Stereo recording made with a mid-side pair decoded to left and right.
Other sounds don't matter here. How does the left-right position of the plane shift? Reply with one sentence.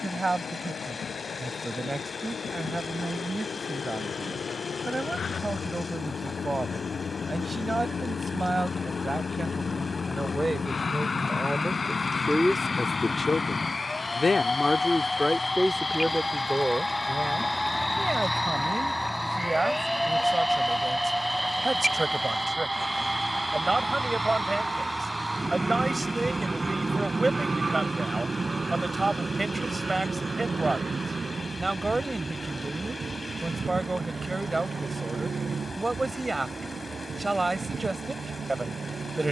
In this clip you hear the plane travel towards the right.